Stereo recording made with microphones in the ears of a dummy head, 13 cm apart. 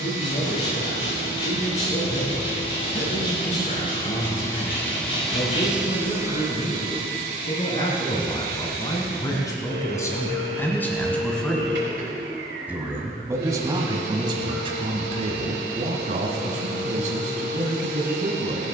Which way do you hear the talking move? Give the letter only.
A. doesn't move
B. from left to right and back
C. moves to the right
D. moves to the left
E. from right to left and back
C.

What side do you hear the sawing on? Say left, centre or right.
left.